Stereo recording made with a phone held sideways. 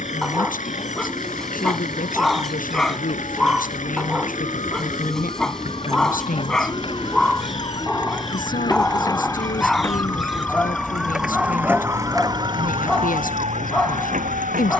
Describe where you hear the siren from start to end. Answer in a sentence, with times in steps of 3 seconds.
In this clip you hear the siren on the left from 0 s, in the centre from 9 s and on the right from 12 s.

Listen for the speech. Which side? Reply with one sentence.
You can hear the speech on the left.